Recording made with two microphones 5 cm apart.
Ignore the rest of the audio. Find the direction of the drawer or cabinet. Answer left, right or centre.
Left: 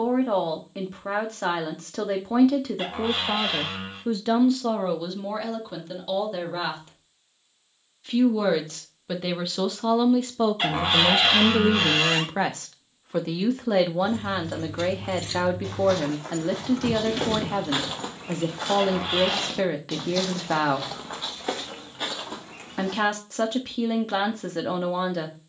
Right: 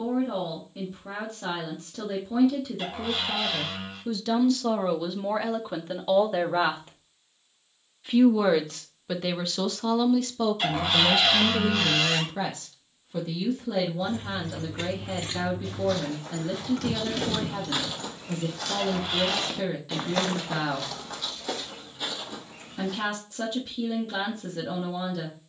left.